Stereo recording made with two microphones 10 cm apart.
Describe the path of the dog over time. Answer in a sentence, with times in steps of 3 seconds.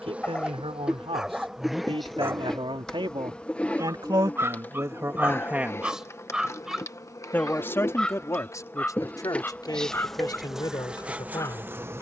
You can hear the dog in the centre from 0 s, on the right from 3 s, in the centre from 6 s and on the left from 9 s.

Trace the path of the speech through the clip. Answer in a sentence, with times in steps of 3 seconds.
In this clip you hear the speech on the right from 0 s and on the left from 6 s.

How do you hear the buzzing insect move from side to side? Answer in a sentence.
In this clip you hear the buzzing insect go left and come back.